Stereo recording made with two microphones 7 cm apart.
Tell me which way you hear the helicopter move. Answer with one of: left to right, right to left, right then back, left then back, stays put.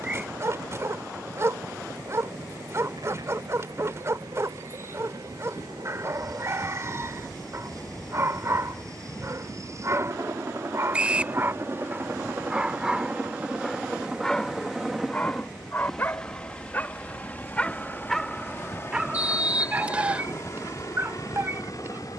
right to left.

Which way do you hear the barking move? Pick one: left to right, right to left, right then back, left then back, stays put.
left then back.